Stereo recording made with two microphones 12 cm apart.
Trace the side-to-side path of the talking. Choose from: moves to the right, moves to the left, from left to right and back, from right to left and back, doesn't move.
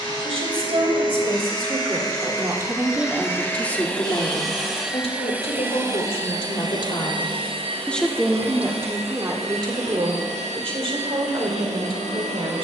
from right to left and back.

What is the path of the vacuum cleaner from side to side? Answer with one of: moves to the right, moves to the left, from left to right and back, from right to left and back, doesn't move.
moves to the right.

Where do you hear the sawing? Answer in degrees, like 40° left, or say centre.
40° right.